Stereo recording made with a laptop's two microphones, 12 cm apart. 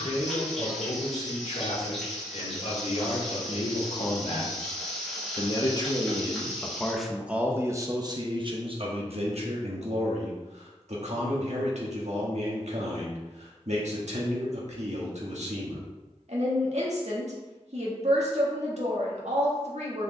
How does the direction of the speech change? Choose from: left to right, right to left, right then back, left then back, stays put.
left to right.